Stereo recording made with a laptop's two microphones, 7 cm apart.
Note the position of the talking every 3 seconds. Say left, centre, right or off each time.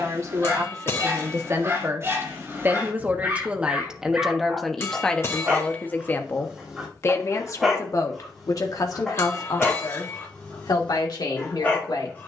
right, centre, left, left.